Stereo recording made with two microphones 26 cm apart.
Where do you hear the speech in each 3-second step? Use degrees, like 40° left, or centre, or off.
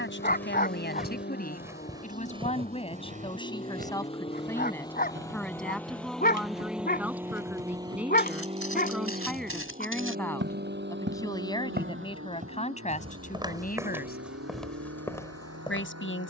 30° left, 10° left, centre, 10° left, 30° left, 50° left.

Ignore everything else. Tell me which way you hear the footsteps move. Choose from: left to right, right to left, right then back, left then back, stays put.
right then back.